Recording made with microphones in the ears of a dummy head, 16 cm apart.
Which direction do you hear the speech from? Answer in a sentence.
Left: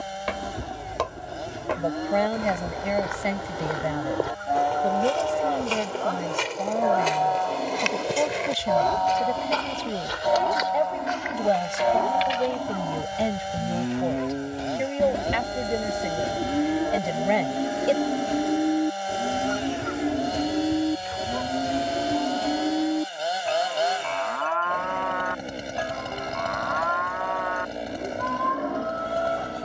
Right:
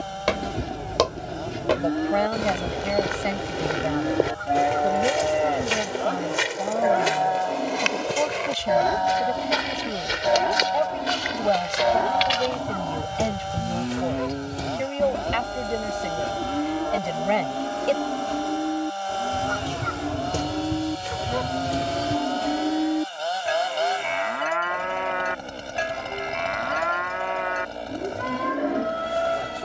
In this clip you hear the speech in the centre.